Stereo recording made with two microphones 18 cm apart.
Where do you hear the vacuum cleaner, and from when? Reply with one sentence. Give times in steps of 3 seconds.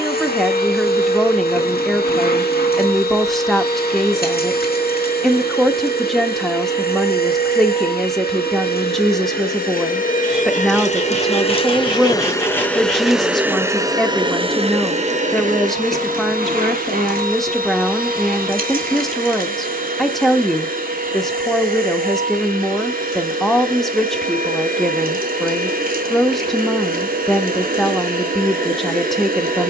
You can hear the vacuum cleaner on the left from 0 s, in the centre from 12 s and on the right from 15 s.